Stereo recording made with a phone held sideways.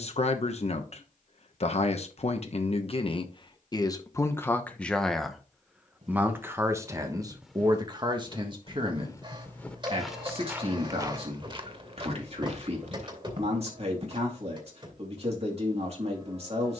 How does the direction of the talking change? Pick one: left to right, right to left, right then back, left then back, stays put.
left to right.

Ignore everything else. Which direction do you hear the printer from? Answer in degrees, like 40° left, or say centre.
30° right.